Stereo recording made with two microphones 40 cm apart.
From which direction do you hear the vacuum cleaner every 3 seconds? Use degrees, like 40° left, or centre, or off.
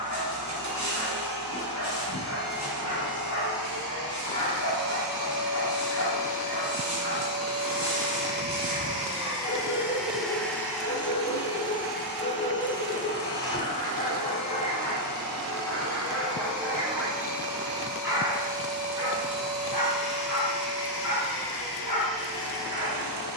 70° right, 60° right, 30° right, centre, 40° left, 50° left, 60° left, 70° left.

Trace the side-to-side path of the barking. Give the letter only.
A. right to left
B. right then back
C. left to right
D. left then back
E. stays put
C.